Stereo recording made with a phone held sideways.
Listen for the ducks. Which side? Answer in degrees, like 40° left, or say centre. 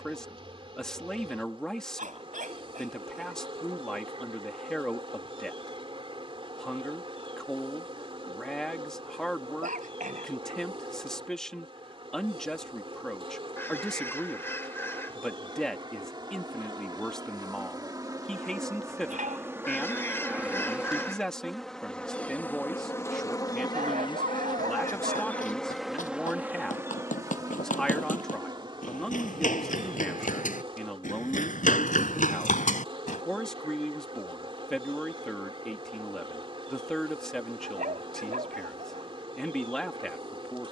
20° left.